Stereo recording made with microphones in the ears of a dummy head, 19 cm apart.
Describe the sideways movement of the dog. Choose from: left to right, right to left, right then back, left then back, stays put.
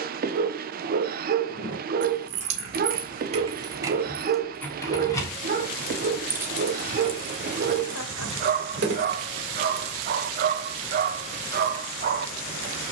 stays put.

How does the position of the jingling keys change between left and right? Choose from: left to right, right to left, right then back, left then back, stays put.
left then back.